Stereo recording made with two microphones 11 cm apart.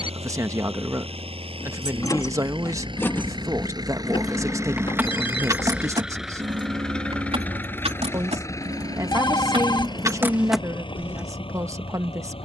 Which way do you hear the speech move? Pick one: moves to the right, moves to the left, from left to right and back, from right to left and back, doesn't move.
doesn't move.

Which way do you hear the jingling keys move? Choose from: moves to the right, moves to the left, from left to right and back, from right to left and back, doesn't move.
from left to right and back.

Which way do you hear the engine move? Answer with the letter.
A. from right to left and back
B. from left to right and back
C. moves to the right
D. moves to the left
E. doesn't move
D.